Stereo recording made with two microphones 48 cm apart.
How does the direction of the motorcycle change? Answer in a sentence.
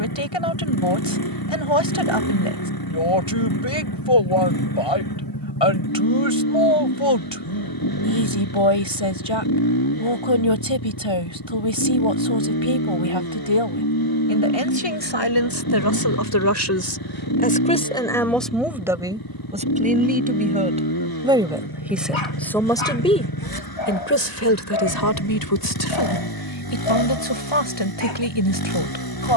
You can hear the motorcycle stay in one place.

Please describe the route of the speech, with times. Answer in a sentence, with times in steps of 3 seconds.
You can hear the speech on the left from 0 s, in the centre from 18 s and on the left from 24 s.